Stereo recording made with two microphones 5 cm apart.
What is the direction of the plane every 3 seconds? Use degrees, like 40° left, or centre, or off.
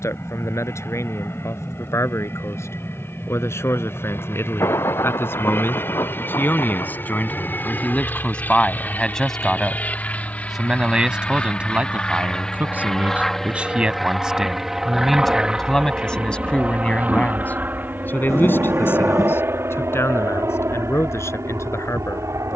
50° left, 50° left, 40° left, 30° left, 10° left, 20° right, 50° right, 60° right.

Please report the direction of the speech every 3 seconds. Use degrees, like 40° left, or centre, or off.
60° left, 50° left, 30° left, 10° right, 20° right, 20° left, 50° left, 60° left.